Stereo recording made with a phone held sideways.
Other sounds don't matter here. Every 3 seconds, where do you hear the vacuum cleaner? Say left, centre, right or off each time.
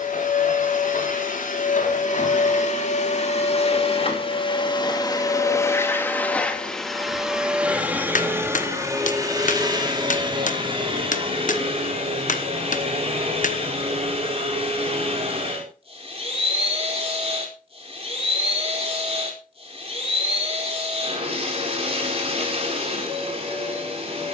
left, left, centre, right, right, right, right, right.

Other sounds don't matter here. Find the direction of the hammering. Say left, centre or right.
left.